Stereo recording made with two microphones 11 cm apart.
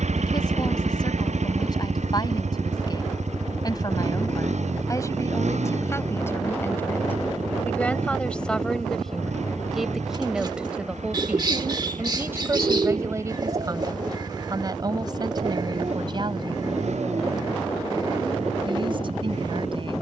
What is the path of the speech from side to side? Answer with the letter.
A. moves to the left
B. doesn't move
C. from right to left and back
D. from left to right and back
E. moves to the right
E.